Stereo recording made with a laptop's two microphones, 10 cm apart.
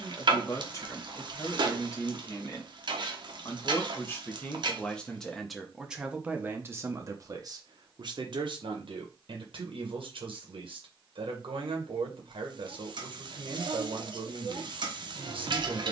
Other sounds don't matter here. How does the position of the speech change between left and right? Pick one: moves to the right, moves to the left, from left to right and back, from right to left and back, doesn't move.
moves to the right.